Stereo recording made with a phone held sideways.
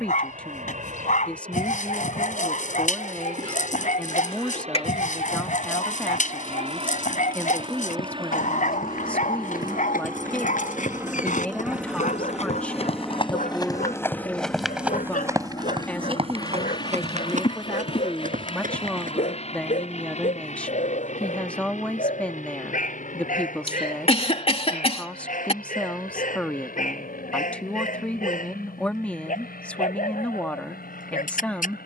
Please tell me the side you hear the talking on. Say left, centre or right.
centre.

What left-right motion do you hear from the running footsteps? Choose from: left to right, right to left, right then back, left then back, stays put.
left to right.